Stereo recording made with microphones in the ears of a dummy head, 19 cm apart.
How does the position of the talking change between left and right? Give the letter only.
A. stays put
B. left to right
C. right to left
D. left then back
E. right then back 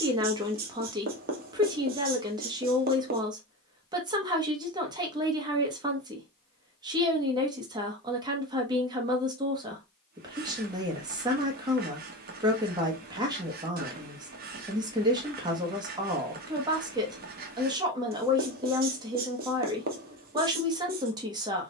A.